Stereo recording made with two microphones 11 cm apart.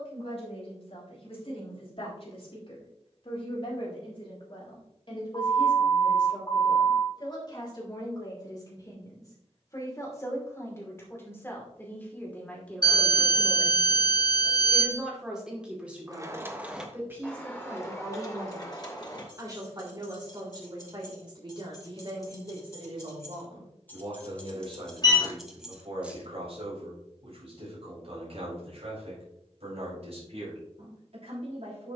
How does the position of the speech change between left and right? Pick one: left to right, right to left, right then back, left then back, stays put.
left to right.